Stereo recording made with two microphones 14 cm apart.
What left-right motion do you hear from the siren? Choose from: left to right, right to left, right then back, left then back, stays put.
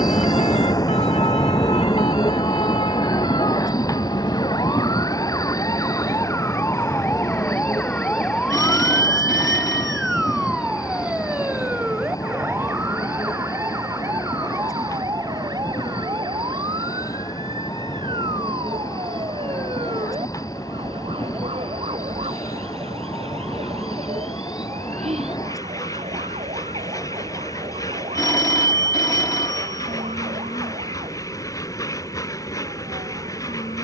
left to right.